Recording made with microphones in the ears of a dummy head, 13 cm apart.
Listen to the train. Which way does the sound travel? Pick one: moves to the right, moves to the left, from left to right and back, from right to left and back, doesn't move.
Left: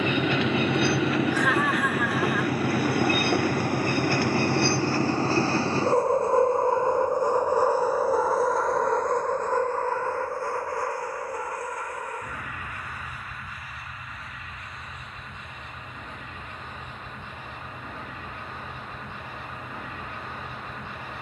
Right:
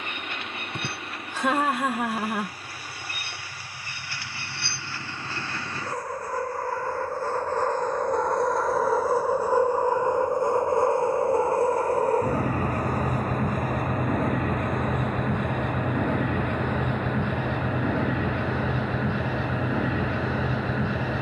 moves to the right.